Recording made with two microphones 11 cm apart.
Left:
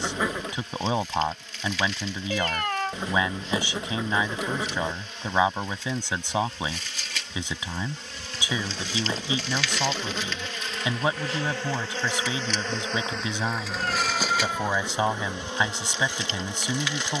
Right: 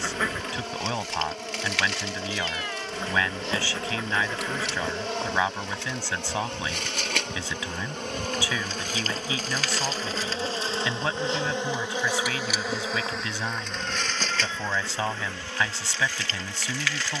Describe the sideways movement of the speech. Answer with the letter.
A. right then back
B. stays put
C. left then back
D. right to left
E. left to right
B.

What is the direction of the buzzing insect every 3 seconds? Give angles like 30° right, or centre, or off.
70° right, 70° right, 60° right, 30° right, centre, 20° left.